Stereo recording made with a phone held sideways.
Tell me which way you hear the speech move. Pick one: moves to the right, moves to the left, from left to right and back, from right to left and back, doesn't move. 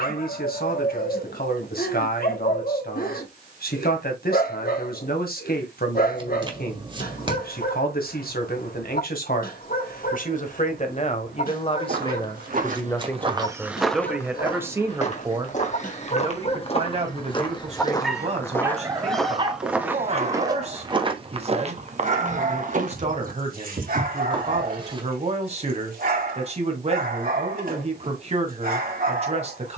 moves to the right.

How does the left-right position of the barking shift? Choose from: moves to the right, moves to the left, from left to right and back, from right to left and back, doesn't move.
moves to the right.